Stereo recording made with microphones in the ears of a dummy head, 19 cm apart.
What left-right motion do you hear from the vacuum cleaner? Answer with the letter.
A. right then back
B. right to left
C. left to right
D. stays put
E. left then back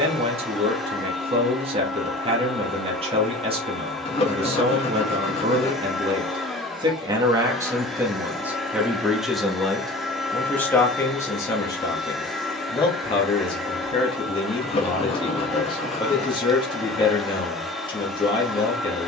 D.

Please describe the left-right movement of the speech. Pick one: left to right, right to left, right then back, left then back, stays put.
right to left.